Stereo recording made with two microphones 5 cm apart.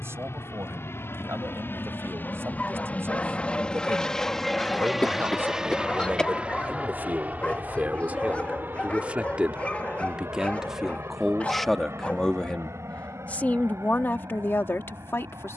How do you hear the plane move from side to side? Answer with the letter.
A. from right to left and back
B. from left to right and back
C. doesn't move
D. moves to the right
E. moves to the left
D.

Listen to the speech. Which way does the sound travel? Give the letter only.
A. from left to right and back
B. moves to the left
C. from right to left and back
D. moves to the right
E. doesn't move
B.